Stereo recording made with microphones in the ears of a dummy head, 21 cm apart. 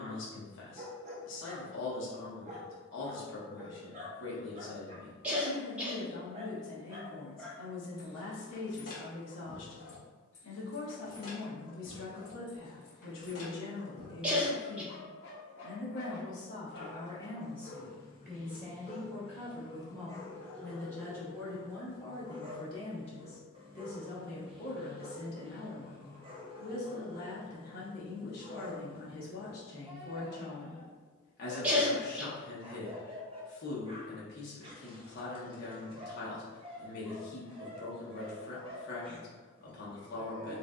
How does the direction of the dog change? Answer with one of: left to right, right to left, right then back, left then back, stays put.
left then back.